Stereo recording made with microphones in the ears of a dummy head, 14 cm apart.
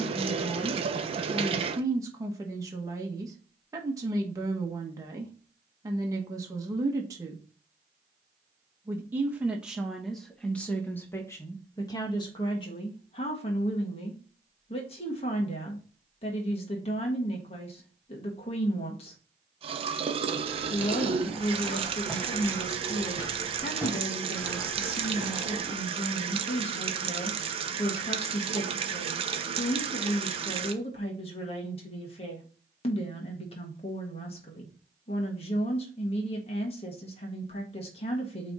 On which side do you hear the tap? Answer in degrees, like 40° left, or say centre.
40° right.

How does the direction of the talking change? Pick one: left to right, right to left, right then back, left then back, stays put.
right to left.